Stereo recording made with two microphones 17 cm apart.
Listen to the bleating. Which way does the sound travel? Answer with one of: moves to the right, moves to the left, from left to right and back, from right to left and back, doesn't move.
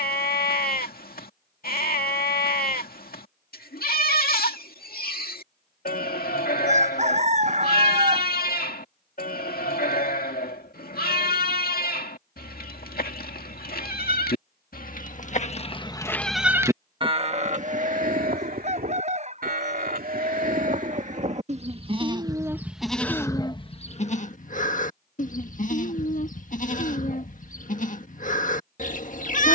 from left to right and back.